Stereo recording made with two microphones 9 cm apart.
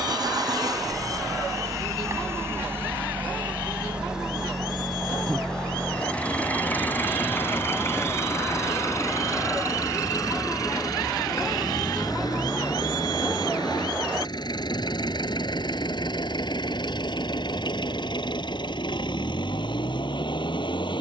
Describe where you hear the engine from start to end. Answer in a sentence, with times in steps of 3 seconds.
In this clip you hear the engine on the right from 0 s, in the centre from 3 s and on the left from 6 s.